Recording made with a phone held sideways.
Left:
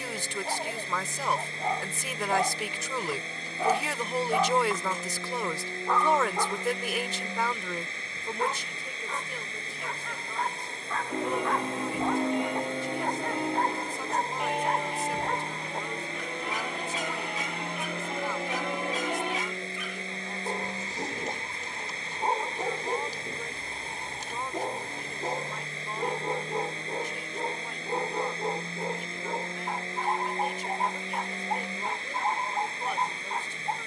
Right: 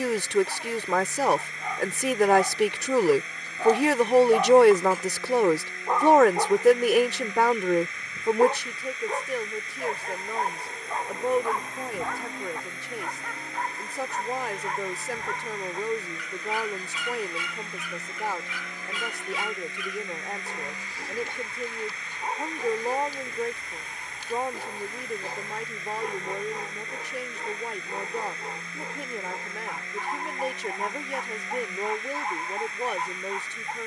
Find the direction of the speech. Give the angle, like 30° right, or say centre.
70° right.